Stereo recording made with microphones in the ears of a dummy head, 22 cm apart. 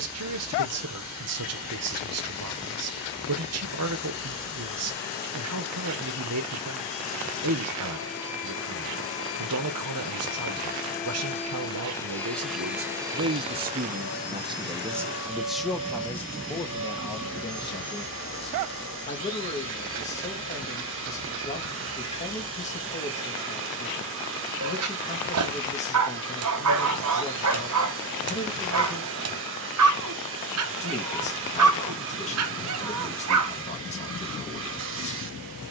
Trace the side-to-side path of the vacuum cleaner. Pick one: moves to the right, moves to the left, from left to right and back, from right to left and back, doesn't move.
moves to the right.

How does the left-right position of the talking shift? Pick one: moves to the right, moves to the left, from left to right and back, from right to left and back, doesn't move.
moves to the left.